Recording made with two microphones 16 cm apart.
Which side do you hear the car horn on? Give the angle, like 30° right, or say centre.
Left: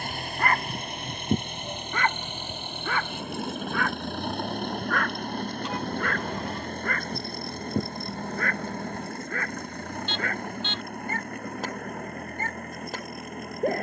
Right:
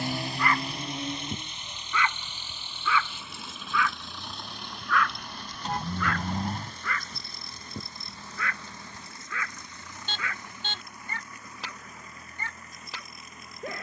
40° right.